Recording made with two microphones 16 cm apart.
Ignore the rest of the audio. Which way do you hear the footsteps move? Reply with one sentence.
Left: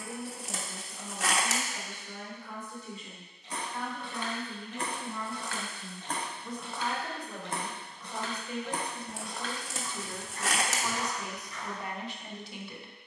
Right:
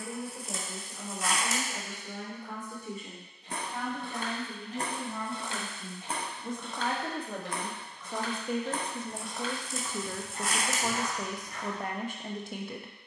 In this clip you hear the footsteps go left and come back.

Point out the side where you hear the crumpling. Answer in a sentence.
In this clip you hear the crumpling on the left.